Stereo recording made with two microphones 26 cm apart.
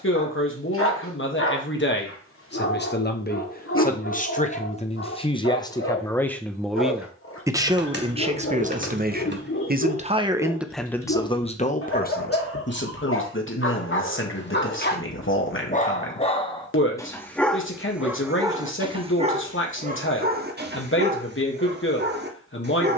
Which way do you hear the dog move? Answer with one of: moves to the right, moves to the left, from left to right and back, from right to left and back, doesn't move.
moves to the right.